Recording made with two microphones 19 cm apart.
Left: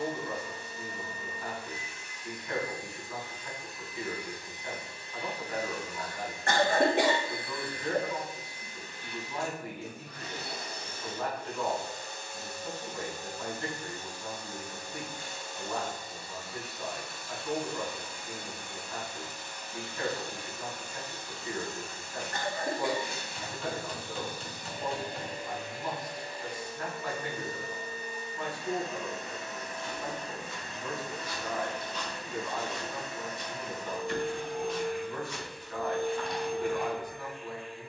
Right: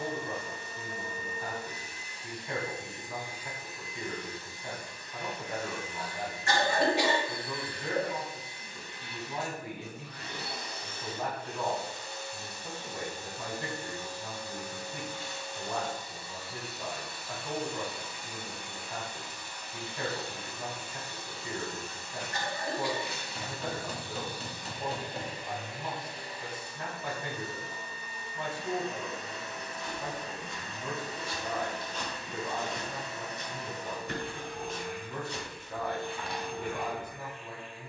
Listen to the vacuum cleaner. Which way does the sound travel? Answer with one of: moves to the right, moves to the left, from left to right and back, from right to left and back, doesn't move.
moves to the left.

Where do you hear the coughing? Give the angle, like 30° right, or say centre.
50° left.